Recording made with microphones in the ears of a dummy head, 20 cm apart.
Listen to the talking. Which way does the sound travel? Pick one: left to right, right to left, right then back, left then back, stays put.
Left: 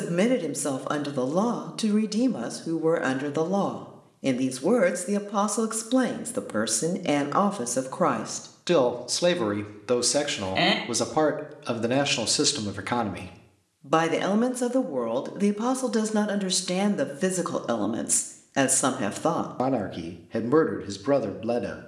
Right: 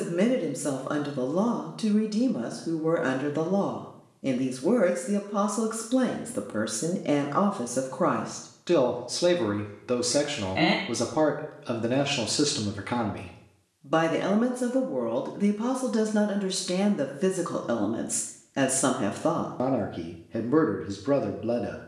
stays put.